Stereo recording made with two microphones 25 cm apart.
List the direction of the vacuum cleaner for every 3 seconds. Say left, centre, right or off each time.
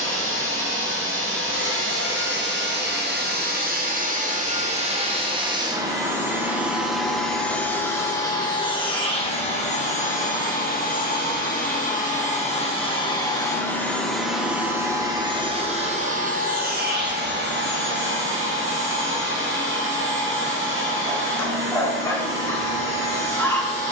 right, right, centre, left, centre, right, right, right.